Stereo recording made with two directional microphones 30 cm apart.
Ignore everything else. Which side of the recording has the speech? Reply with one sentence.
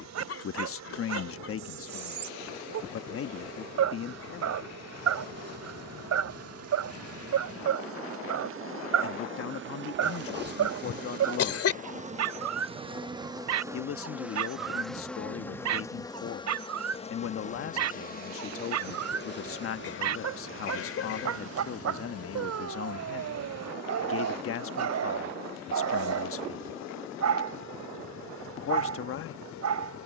In this clip you hear the speech on the left.